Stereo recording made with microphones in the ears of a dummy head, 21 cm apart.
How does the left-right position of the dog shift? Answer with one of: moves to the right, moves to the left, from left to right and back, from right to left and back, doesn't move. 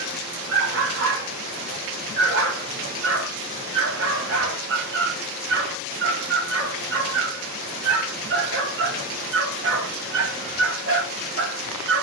doesn't move.